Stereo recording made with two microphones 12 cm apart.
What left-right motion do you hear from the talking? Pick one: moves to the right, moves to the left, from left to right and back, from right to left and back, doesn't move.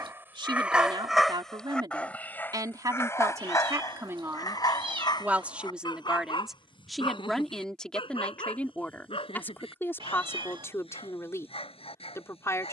moves to the left.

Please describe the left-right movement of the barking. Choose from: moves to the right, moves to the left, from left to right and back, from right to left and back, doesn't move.
moves to the left.